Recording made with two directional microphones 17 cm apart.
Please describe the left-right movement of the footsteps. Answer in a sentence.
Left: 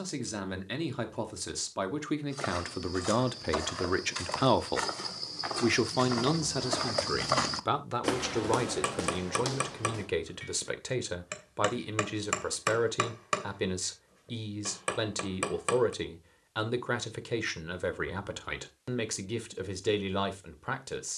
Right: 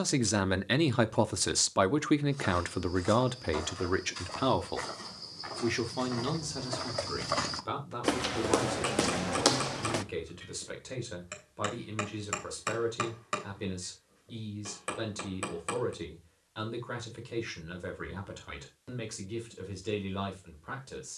In this clip you hear the footsteps move to the right.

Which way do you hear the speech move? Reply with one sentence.
You can hear the speech travel towards the left.